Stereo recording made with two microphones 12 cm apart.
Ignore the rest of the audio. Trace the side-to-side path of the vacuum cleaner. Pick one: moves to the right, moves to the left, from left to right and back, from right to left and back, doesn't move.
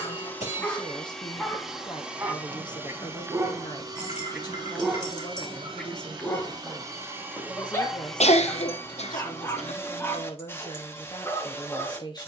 from left to right and back.